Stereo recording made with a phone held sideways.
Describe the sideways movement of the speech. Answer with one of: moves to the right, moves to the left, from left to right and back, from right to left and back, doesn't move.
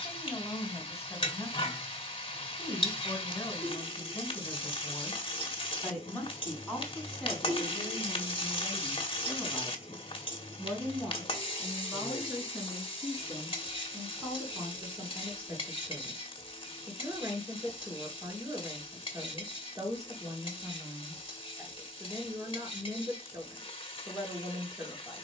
moves to the right.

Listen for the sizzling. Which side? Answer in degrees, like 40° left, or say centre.
40° left.